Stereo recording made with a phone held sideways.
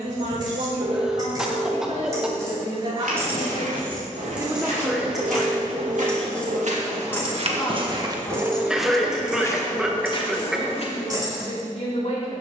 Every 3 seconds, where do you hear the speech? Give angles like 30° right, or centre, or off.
50° right, 20° right, 20° left, 40° left.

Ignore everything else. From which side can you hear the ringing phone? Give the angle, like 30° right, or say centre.
60° right.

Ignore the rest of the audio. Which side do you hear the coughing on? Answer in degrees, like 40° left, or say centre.
centre.